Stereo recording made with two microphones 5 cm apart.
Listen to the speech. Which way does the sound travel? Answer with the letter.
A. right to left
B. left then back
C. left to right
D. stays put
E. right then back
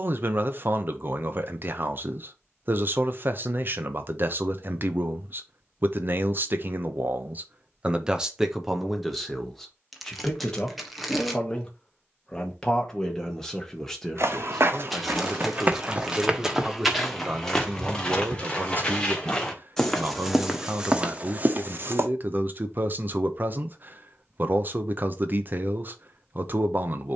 B.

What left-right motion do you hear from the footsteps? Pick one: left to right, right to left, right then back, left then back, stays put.
left then back.